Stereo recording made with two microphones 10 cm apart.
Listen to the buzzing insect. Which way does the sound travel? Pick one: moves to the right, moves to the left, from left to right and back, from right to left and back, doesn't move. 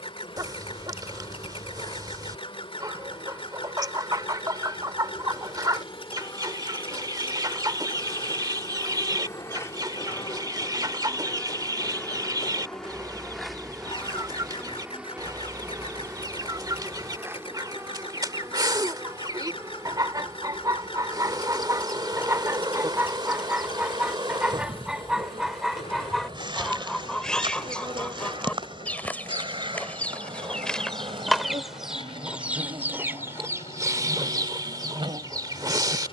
moves to the right.